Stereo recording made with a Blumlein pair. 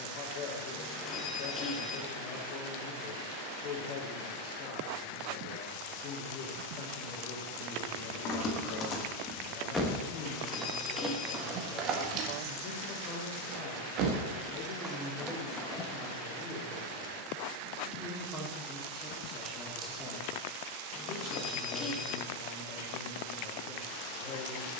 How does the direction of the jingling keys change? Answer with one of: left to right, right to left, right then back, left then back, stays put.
right then back.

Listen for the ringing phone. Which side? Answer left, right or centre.
left.